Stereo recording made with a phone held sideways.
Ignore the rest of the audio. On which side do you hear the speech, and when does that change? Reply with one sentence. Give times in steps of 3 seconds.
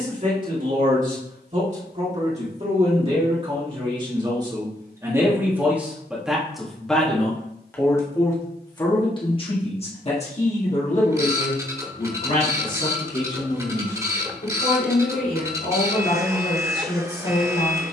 In this clip you hear the speech on the right from 0 s, in the centre from 6 s and on the left from 9 s.